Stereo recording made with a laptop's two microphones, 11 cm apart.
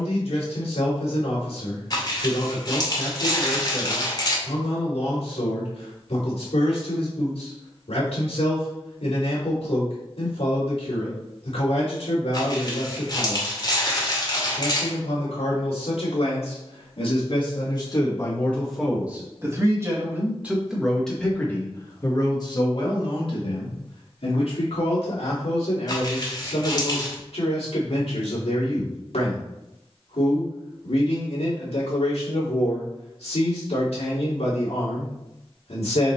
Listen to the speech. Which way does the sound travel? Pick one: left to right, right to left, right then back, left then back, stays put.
right then back.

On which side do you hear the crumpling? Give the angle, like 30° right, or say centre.
40° left.